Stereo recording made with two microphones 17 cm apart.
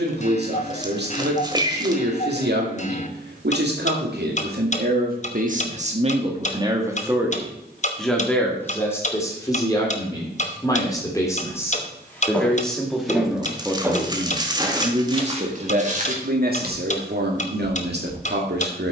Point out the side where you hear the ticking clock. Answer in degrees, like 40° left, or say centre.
40° left.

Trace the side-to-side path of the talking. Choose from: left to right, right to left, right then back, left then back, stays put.
left then back.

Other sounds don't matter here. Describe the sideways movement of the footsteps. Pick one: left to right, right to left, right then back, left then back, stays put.
left to right.